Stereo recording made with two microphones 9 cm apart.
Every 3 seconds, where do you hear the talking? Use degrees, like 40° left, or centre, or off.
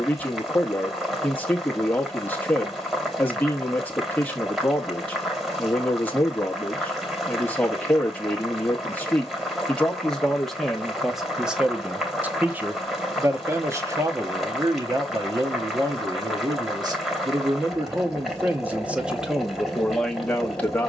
20° left, 20° left, 20° left, centre, 30° right, 40° right, centre.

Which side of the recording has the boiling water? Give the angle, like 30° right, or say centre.
centre.